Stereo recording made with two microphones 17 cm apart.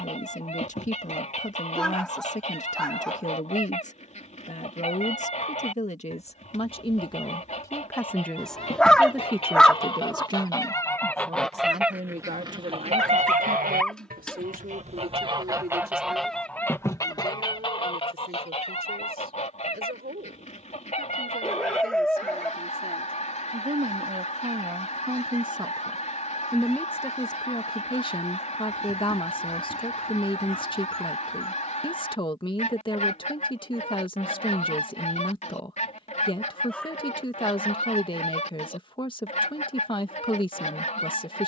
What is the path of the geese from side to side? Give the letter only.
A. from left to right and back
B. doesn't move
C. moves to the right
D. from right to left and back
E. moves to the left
A.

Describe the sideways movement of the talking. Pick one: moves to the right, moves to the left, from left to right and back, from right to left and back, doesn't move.
from left to right and back.